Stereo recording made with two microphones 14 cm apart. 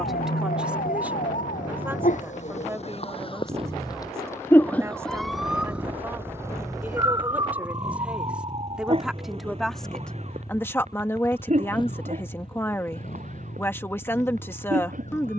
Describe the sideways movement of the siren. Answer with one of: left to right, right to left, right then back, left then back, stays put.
left to right.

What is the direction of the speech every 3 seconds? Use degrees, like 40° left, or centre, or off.
10° right, 20° right, 10° right, 10° left, 10° left.